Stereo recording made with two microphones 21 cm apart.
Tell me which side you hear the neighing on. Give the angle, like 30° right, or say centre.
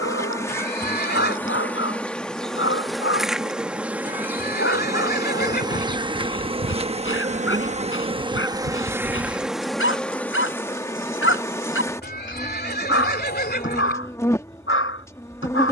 50° left.